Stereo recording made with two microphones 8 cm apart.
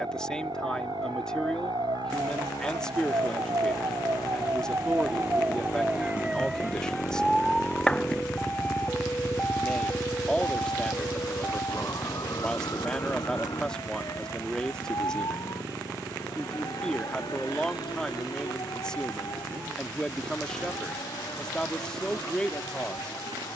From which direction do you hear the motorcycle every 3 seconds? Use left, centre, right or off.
left, left, left, right, right, right, right, right.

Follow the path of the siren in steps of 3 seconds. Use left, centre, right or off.
right, right, centre, left, left, left, left, left.